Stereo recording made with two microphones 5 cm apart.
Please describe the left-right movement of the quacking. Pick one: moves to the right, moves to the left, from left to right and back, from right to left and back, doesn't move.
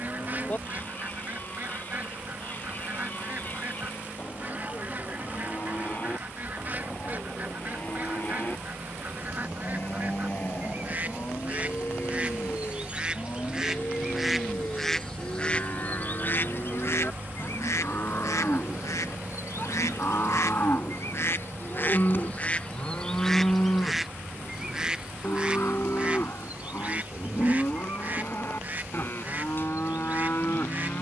from right to left and back.